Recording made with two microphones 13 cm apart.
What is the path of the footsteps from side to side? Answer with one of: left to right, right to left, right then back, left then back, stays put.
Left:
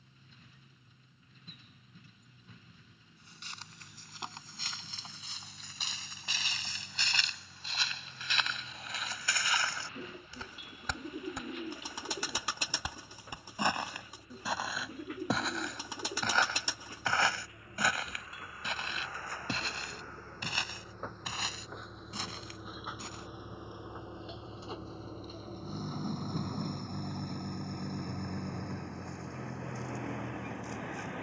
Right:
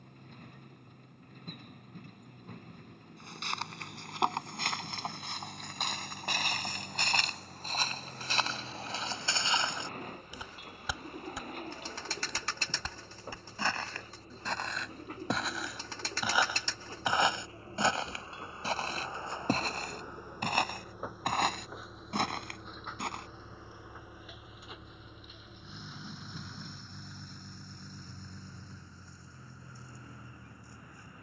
left then back.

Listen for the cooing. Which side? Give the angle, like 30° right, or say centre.
10° left.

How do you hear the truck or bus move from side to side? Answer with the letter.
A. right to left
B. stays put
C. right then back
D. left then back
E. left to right
A.